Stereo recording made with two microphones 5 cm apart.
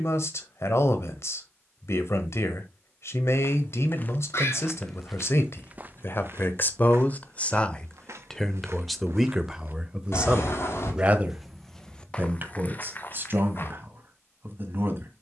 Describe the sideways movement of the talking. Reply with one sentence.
In this clip you hear the talking travel towards the right.